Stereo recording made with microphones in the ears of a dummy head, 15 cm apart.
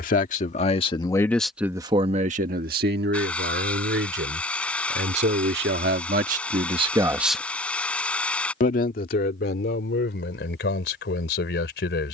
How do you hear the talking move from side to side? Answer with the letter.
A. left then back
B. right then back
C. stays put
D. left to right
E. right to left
B.